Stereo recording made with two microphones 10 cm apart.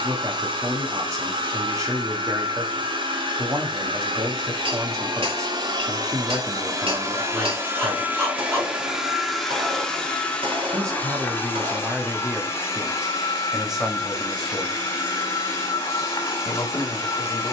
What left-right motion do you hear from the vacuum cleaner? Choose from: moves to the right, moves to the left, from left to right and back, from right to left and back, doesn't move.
moves to the left.